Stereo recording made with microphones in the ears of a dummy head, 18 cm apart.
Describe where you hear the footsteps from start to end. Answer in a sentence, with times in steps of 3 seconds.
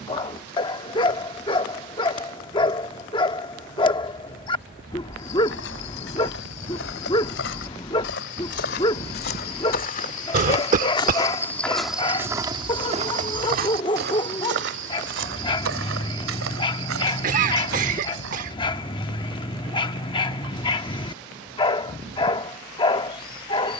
You can hear the footsteps not at all from 0 s, on the left from 3 s, on the right from 12 s and not at all from 21 s.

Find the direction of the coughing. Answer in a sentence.
In this clip you hear the coughing on the right.